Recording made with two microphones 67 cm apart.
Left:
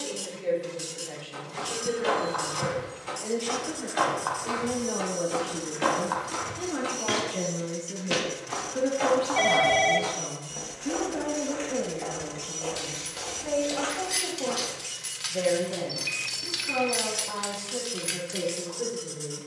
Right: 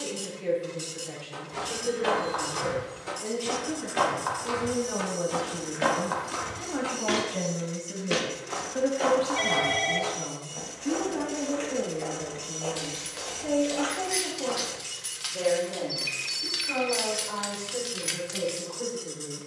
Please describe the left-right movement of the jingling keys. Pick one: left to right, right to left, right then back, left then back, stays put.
left to right.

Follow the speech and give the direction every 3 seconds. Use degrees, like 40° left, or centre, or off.
50° right, 40° right, 20° right, 10° left, 40° left, 60° left, 70° left.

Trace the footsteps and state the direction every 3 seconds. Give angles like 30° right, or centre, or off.
70° right, 40° right, 10° left, 40° left, 50° left, off, off.